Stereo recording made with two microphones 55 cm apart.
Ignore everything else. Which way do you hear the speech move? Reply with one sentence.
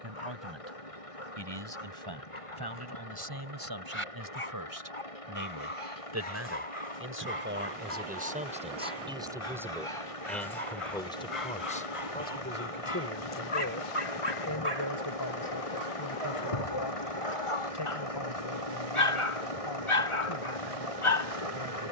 In this clip you hear the speech travel towards the left.